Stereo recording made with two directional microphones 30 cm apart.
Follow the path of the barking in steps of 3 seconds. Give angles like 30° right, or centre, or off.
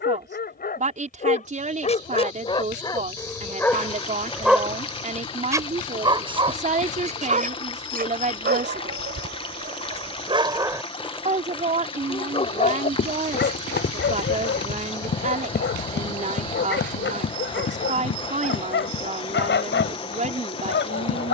20° left, centre, 30° right, 20° right, 30° left, 40° left, 40° left.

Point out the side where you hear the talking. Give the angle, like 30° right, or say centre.
20° right.